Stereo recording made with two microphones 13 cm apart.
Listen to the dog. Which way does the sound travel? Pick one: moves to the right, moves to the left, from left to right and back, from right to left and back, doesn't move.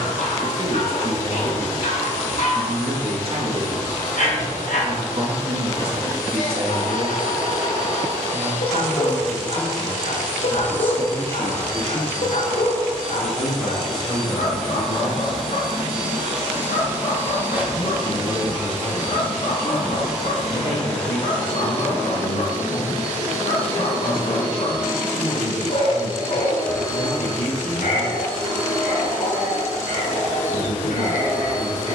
doesn't move.